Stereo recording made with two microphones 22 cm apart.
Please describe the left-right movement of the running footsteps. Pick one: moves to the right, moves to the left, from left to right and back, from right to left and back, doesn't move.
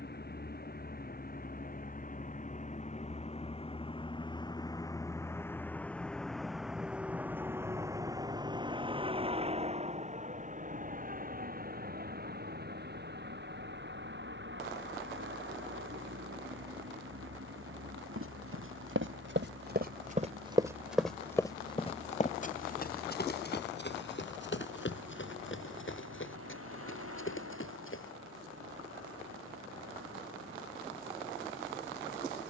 moves to the left.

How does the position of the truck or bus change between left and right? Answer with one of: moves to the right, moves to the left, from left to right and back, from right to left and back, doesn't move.
moves to the right.